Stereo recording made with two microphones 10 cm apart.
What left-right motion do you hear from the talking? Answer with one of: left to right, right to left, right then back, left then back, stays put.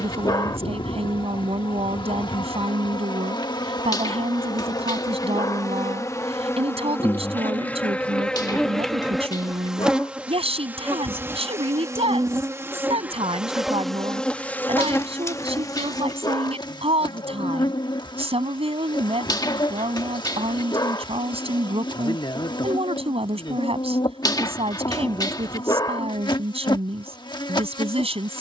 stays put.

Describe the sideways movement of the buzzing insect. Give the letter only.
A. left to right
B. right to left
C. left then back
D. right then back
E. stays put
D.